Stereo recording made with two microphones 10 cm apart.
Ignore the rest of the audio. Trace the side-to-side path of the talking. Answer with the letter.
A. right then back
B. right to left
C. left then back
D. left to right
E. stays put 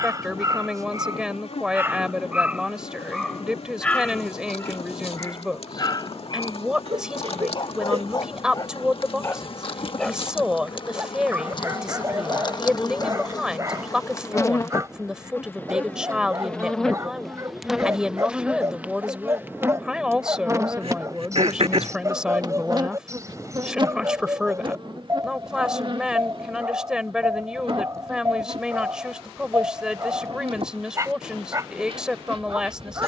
E.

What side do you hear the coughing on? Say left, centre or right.
right.